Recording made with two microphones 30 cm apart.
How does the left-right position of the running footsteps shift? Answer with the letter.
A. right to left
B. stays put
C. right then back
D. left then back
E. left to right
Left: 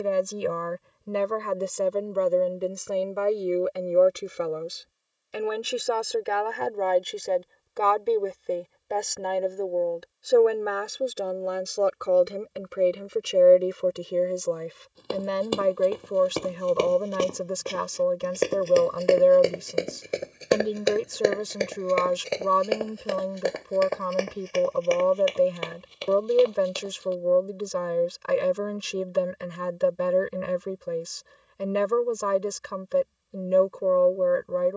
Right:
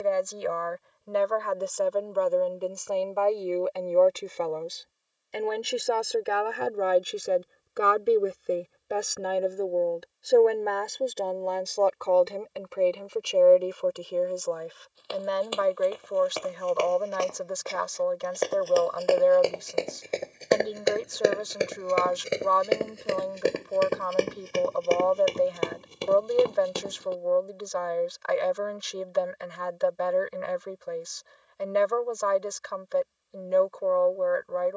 E.